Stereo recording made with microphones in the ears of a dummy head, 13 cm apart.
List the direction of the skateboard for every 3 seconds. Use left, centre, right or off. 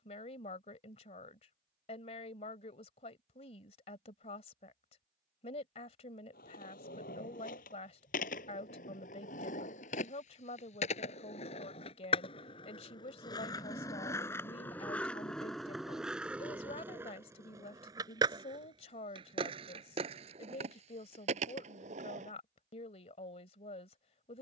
off, off, left, left, left, centre, right, right.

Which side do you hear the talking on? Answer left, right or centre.
left.